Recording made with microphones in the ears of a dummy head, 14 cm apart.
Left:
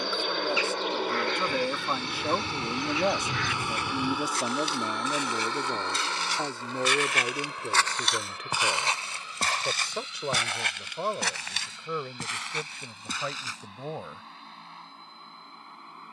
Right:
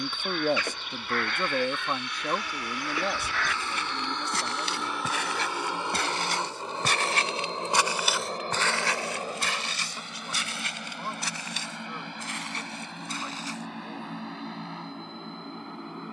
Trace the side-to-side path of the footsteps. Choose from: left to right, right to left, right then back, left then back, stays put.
right to left.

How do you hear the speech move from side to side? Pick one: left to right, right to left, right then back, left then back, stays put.
right to left.